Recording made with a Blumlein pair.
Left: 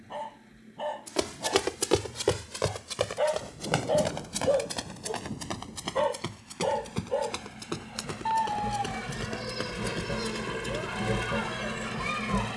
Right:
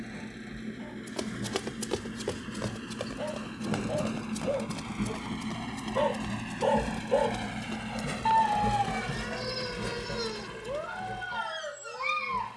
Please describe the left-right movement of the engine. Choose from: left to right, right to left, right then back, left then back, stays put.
right to left.